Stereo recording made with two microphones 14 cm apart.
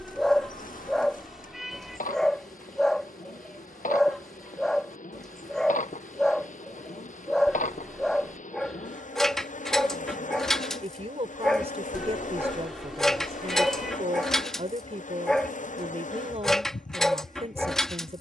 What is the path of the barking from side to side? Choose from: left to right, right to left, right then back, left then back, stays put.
stays put.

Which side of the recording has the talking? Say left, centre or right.
right.